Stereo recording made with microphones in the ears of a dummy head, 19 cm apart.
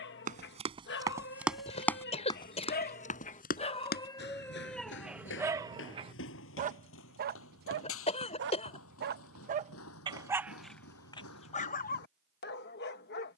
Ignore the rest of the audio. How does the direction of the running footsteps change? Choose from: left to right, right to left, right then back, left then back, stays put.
right to left.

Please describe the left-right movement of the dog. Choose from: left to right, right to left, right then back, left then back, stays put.
right then back.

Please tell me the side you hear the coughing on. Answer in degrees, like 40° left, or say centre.
30° left.